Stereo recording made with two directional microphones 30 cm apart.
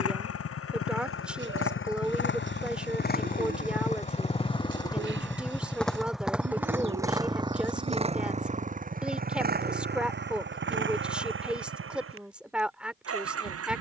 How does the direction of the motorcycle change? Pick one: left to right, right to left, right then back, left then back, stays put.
left to right.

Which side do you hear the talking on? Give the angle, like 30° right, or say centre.
centre.